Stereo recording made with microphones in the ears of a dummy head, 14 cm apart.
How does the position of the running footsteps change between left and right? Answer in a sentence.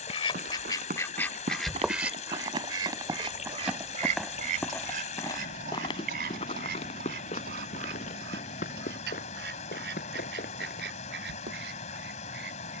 You can hear the running footsteps move to the left.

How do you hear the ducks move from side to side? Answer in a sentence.
In this clip you hear the ducks travel towards the right.